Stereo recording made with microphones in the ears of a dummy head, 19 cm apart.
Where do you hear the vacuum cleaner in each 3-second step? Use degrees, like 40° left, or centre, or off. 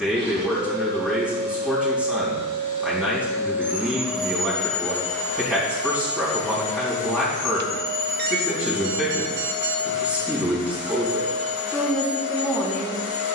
40° right, centre, 40° left, 60° left, 60° left.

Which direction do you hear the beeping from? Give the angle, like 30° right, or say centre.
50° right.